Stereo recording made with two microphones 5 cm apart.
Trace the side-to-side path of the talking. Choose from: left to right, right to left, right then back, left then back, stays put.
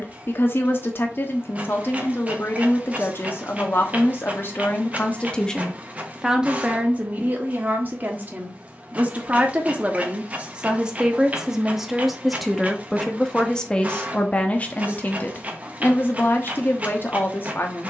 right then back.